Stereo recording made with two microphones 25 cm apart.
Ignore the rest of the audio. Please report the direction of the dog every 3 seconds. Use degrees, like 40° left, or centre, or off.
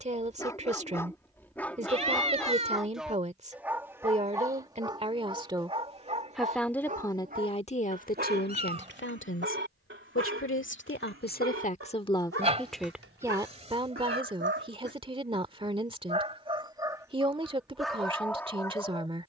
10° left, 10° right, 30° right, 50° right, 50° right, 20° right, 10° left.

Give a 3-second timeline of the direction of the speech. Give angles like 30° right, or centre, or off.
30° right, 20° right, 20° left, 50° left, 10° right, 20° right, 20° right.